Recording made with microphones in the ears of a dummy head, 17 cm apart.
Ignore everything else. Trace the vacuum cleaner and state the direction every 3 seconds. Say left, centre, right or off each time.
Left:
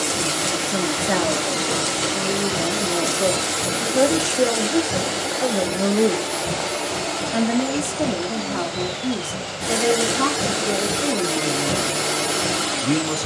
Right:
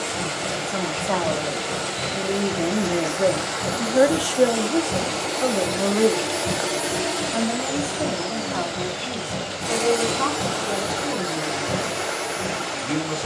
left, left, centre, left, left.